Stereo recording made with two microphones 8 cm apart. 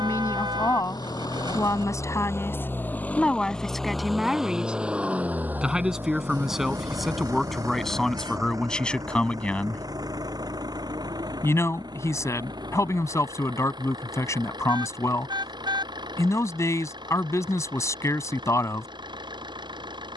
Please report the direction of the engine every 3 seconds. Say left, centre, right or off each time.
left, centre, right, right, right, right, right.